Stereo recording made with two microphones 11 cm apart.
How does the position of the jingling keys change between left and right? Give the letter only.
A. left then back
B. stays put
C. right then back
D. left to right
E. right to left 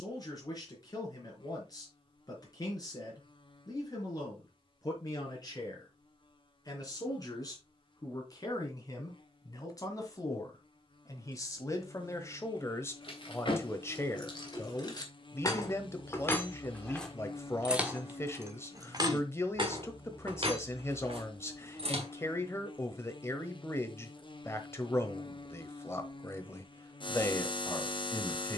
D.